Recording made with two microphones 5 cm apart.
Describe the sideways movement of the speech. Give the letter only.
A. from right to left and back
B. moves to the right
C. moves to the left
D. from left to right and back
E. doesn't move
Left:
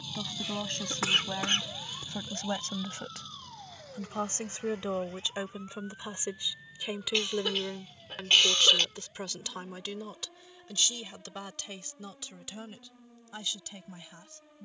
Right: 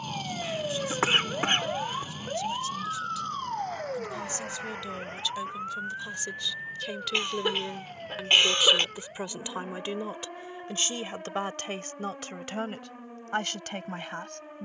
B.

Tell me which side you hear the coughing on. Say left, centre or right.
right.